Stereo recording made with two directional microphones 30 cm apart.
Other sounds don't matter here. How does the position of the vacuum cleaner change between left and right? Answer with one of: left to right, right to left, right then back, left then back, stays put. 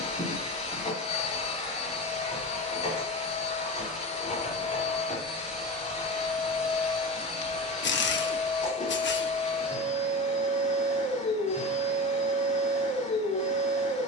stays put.